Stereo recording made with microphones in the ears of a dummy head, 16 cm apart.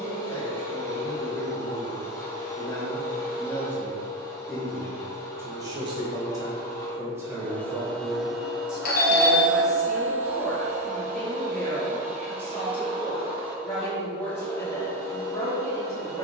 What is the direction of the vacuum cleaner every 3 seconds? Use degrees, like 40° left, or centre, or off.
20° left, 20° left, 10° left, 30° right, 10° right, 20° left.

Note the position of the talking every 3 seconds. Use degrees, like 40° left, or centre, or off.
20° left, centre, 10° right, centre, 10° left, 20° left.